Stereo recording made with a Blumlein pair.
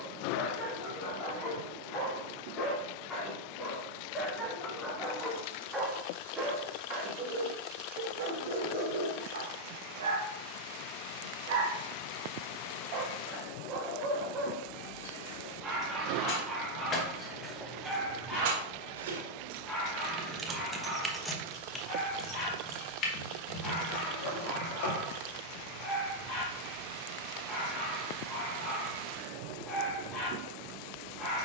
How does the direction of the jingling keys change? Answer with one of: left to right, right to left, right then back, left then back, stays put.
right then back.